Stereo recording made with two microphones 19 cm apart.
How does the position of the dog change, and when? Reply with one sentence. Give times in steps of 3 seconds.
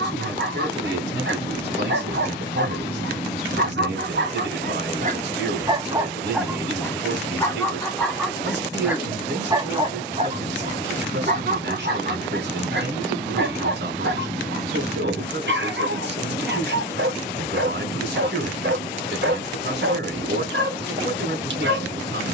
In this clip you hear the dog on the right from 0 s, in the centre from 6 s and on the right from 9 s.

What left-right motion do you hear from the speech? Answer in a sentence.
In this clip you hear the speech stay in one place.